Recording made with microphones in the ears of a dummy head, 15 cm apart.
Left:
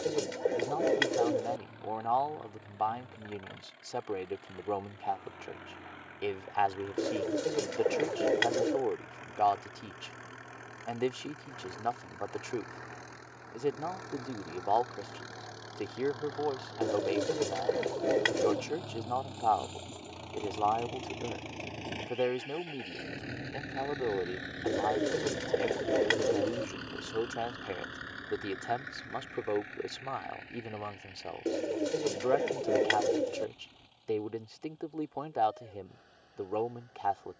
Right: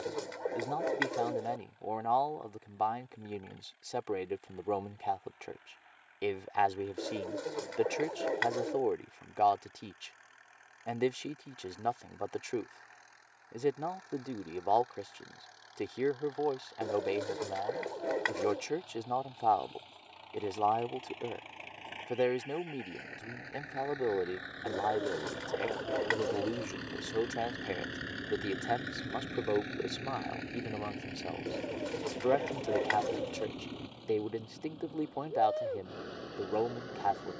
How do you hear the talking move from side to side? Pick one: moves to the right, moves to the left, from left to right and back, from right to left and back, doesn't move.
doesn't move.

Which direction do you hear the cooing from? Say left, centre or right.
left.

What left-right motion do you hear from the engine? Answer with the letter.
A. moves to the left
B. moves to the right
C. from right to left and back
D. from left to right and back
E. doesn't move
B.